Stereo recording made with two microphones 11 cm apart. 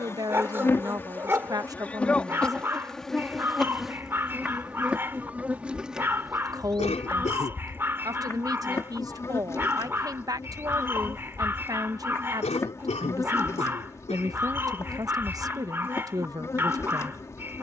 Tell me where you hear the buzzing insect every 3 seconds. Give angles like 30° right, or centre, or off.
20° left, 10° right, 10° left, 30° left, 30° left, 30° left.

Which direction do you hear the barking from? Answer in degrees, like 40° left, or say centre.
20° right.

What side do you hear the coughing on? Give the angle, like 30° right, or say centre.
80° left.